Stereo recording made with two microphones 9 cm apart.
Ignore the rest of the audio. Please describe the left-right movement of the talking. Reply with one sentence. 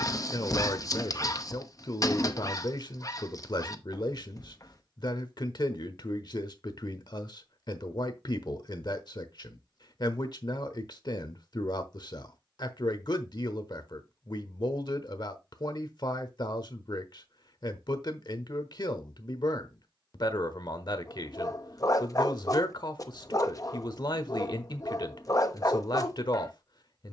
You can hear the talking stay in one place.